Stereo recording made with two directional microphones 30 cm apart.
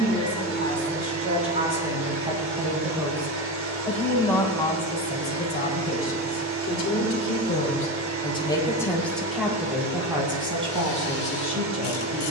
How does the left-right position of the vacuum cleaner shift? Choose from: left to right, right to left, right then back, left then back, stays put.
stays put.